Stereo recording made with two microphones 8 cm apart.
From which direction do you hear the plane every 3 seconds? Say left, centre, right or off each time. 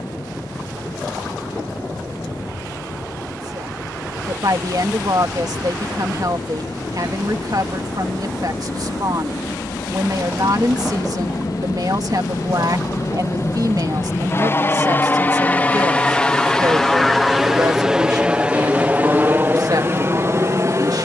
left, left, left, left, left, centre, right.